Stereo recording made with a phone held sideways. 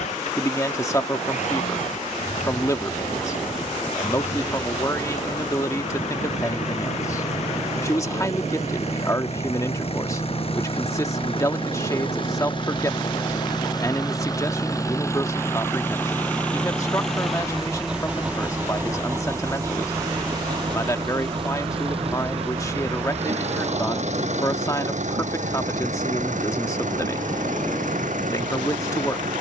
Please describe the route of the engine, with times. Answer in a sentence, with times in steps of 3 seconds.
You can hear the engine on the left from 0 s, in the centre from 15 s and on the right from 18 s.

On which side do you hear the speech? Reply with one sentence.
You can hear the speech on the left.